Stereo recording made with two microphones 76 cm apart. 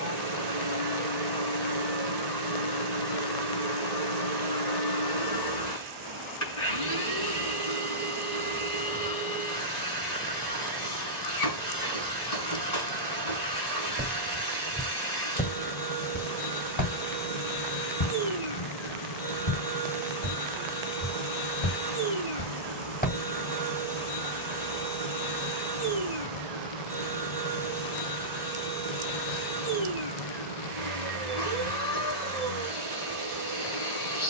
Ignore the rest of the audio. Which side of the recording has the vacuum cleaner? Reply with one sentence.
In this clip you hear the vacuum cleaner on the left.